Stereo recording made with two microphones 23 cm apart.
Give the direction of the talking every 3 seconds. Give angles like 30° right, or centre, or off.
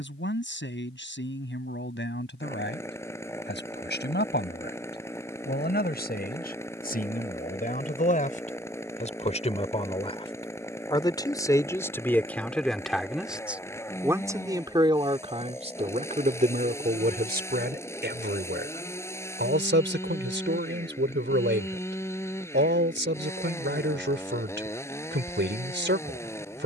50° left, 50° left, 40° left, 20° left, 10° right, 40° right, 50° right, 50° right, 50° right.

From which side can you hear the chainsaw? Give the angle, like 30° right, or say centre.
10° left.